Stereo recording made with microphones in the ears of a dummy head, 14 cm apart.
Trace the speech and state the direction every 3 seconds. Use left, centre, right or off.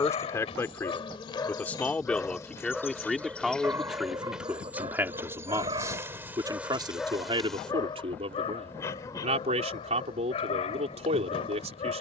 centre, centre, right, right.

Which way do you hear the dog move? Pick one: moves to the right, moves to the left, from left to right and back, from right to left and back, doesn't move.
from left to right and back.